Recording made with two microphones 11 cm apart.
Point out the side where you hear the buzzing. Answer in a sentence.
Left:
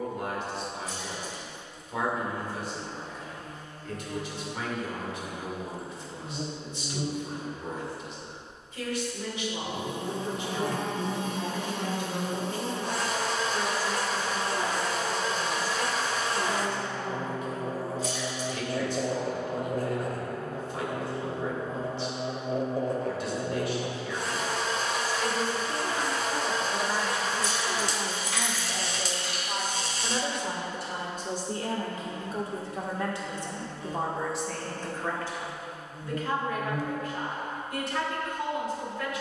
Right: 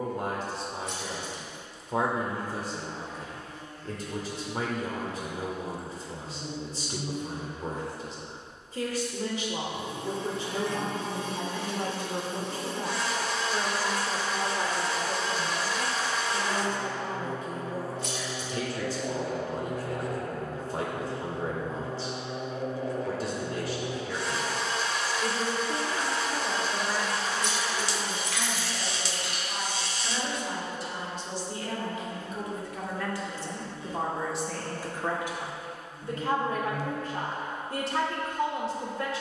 In this clip you hear the buzzing on the left.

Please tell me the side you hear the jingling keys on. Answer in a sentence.
In this clip you hear the jingling keys on the right.